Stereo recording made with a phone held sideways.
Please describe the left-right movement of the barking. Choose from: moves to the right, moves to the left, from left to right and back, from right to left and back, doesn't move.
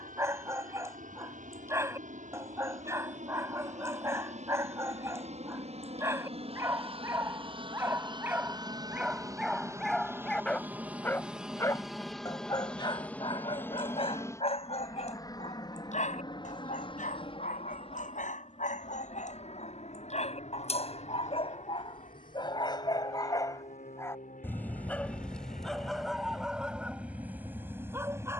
from right to left and back.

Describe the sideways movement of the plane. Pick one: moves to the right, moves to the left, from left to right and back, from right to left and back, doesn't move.
moves to the left.